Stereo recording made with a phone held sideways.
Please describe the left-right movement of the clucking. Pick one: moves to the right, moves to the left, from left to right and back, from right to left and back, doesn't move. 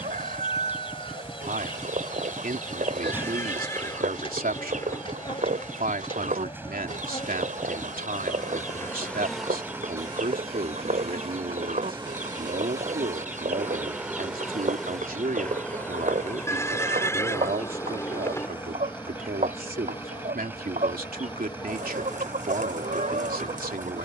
doesn't move.